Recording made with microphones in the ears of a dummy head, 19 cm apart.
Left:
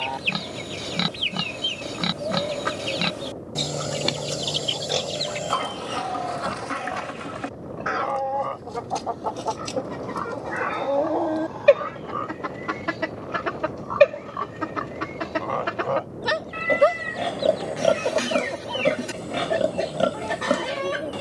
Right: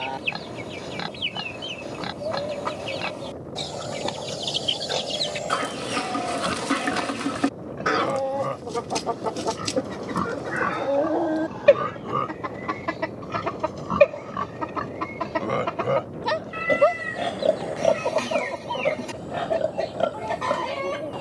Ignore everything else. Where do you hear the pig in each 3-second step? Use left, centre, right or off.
left, left, right, right, right, centre, left.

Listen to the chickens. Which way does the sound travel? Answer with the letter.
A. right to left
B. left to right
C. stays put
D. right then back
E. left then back
D.